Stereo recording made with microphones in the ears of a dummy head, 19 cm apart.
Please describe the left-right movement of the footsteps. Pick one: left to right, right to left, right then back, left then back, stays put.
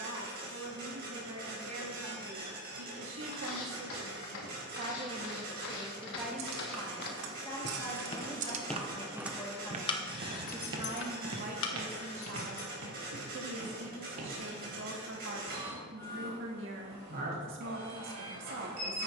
left to right.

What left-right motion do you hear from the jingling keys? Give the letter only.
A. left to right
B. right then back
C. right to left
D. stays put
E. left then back
C.